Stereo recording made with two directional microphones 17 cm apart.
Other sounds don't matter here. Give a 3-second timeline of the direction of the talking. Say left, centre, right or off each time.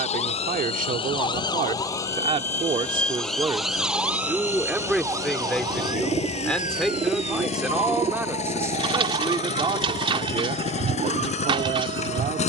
right, centre, centre, right.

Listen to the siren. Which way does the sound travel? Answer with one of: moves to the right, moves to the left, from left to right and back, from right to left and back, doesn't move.
moves to the right.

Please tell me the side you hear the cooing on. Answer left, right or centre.
right.